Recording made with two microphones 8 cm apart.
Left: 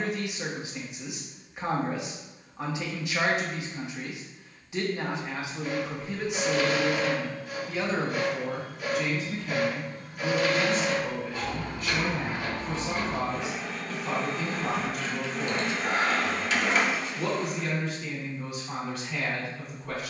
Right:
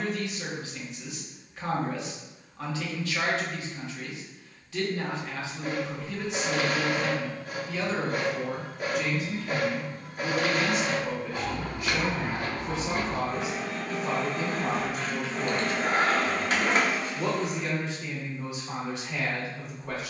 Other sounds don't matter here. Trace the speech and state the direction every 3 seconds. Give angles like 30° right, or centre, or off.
20° left, 20° left, 10° left, 10° right, 20° right, 20° right, 20° right.